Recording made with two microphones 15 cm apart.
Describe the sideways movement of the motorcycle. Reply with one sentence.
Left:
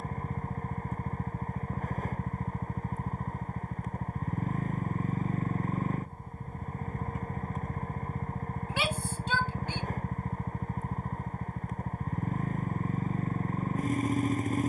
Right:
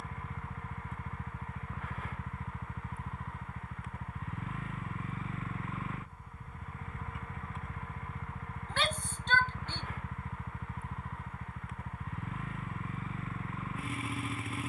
You can hear the motorcycle stay in one place.